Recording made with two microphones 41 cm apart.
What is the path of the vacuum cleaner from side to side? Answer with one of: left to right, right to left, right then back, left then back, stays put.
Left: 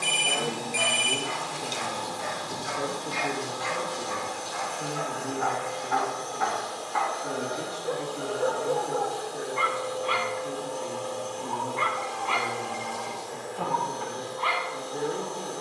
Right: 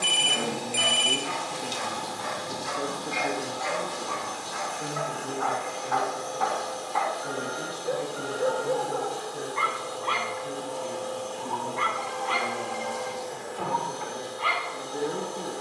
right then back.